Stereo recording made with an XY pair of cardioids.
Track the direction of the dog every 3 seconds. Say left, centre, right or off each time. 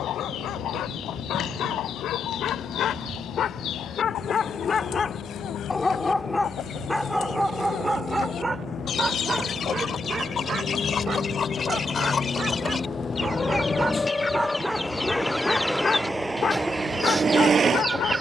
left, left, centre, right, right, left.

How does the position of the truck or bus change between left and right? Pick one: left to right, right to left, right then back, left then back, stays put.
left to right.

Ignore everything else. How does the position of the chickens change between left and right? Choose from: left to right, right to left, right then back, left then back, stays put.
left to right.